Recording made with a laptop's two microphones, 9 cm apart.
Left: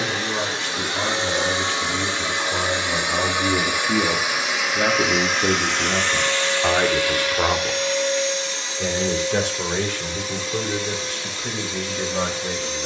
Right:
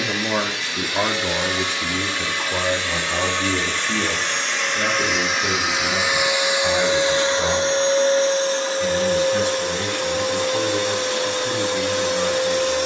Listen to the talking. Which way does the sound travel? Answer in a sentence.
You can hear the talking move from right to left.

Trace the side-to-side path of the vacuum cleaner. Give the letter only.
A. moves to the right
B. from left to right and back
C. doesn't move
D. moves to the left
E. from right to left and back
A.